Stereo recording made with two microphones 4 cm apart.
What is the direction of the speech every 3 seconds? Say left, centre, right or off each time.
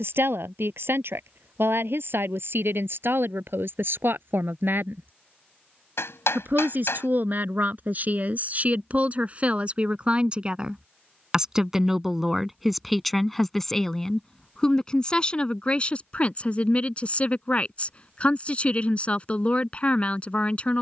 right, right, right, right, centre, left, left.